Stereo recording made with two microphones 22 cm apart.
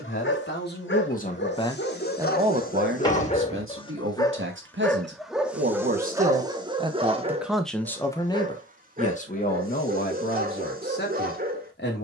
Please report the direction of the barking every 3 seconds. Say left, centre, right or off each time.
left, centre, right, right.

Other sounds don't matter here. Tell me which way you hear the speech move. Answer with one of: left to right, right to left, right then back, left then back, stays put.
right then back.